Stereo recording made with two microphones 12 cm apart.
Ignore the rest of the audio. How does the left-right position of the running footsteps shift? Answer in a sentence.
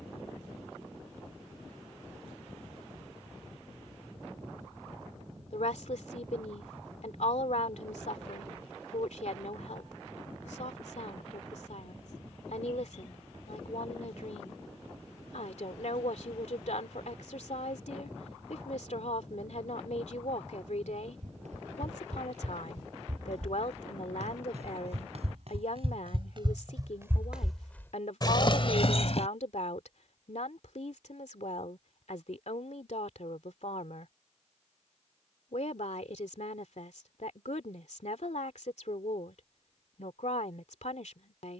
In this clip you hear the running footsteps go from the right side to the left.